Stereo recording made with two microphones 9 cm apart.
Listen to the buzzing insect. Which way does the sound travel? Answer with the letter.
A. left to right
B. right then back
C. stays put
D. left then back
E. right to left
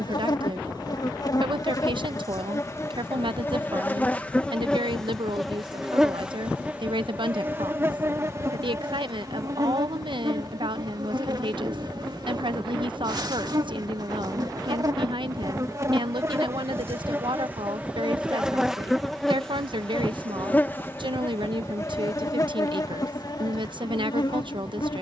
B.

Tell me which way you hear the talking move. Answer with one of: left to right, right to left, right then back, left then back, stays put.
stays put.